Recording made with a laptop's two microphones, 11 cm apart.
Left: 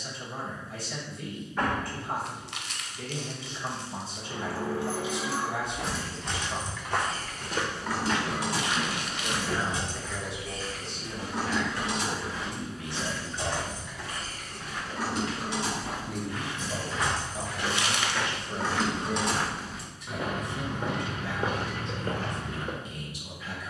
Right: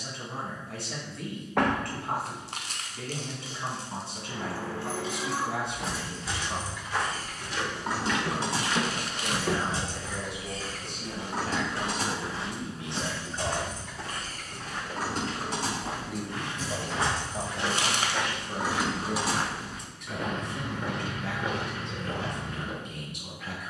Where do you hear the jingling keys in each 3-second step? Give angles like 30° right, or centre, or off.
off, 10° left, 20° right, 40° right, 50° right, 40° right, 10° right, off.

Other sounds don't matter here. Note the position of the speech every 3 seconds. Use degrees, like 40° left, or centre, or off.
70° right, 70° right, 70° right, 50° right, 30° right, 30° right, 60° right, 70° right.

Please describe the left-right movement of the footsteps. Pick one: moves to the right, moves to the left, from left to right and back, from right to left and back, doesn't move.
from left to right and back.